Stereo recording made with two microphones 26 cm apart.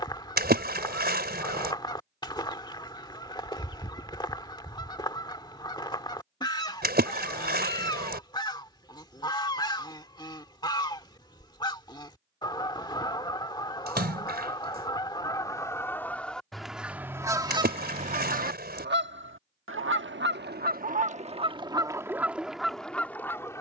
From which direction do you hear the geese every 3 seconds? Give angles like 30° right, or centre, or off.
20° left, 20° left, 20° left, 20° left, 20° left, centre, 40° right, 10° right.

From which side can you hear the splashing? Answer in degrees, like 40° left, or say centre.
40° right.